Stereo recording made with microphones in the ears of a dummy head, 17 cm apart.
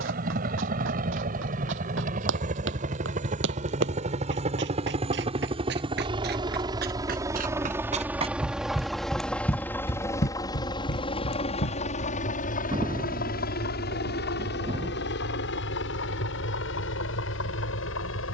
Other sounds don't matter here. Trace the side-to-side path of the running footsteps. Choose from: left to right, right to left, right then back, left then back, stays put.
right to left.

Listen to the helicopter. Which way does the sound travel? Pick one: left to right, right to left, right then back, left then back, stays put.
right to left.